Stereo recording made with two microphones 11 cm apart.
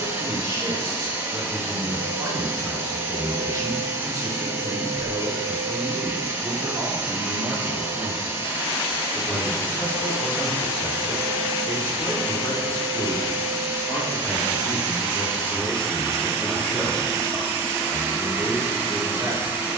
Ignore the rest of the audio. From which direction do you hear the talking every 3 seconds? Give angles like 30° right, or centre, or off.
30° right, 30° right, 10° right, 40° left, 30° left, 10° left, 20° right.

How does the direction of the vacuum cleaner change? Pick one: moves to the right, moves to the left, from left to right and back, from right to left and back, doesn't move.
doesn't move.